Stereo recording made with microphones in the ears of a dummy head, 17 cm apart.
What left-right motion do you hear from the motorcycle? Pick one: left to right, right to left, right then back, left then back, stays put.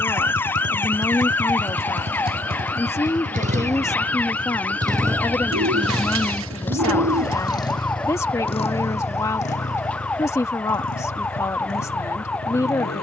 right to left.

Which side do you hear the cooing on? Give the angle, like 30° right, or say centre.
80° right.